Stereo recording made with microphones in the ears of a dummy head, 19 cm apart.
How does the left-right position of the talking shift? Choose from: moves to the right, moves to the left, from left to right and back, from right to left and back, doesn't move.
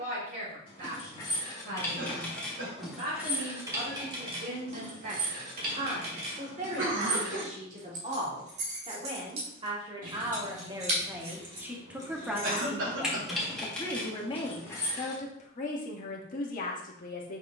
moves to the left.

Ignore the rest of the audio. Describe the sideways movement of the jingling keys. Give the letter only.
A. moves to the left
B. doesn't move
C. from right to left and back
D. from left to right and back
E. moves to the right
D.